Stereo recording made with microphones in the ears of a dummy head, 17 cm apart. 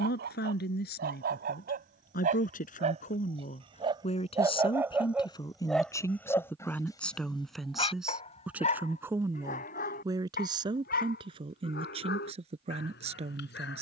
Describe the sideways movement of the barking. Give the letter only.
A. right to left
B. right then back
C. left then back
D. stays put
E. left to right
A.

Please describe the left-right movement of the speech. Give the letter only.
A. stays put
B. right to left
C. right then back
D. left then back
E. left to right
E.